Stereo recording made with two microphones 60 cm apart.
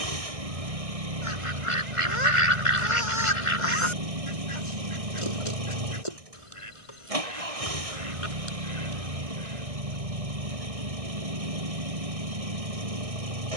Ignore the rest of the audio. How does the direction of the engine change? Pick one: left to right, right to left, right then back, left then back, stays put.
stays put.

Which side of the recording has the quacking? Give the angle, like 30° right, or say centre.
60° left.